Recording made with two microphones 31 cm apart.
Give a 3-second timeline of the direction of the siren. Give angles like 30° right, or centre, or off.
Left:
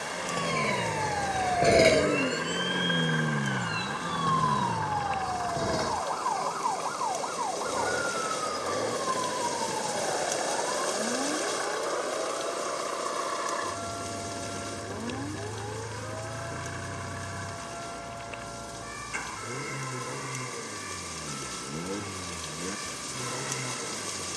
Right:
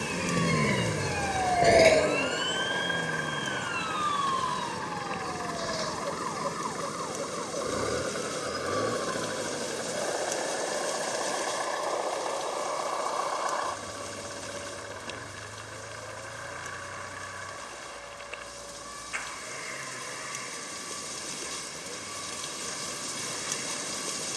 centre, 60° left, 70° left, 80° left, 80° left, 80° left, 80° left, 80° left.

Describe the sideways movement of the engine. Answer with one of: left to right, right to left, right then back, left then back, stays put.
right to left.